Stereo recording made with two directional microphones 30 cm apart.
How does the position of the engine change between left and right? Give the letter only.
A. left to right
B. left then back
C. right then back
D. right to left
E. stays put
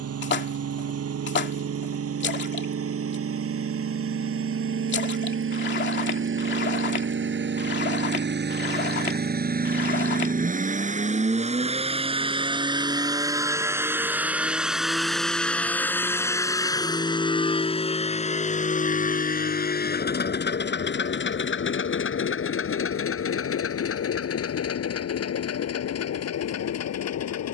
D.